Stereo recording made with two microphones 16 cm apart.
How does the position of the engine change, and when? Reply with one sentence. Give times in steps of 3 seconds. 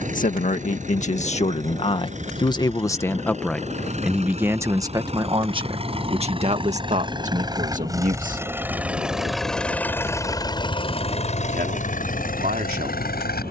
In this clip you hear the engine on the right from 0 s and on the left from 9 s.